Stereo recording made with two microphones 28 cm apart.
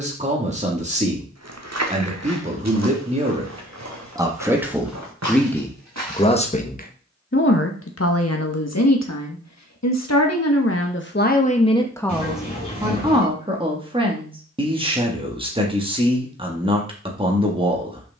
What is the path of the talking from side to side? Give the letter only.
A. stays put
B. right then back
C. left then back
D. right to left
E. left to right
C.